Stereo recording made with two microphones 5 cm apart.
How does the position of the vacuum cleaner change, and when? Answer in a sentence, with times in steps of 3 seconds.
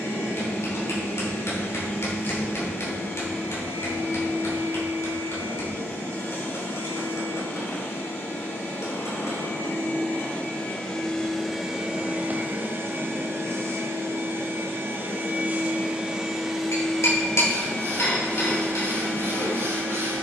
You can hear the vacuum cleaner on the left from 0 s, on the right from 12 s, in the centre from 15 s and on the left from 18 s.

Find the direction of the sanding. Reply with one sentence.
In this clip you hear the sanding on the right.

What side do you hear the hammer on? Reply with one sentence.
You can hear the hammer on the left.